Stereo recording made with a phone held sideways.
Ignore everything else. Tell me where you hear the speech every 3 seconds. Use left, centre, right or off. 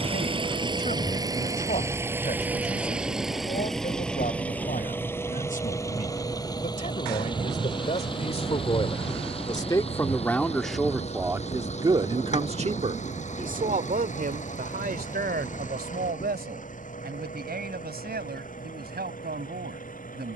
left, left, left, centre, right, right, right.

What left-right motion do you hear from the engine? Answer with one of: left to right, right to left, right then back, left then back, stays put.
right to left.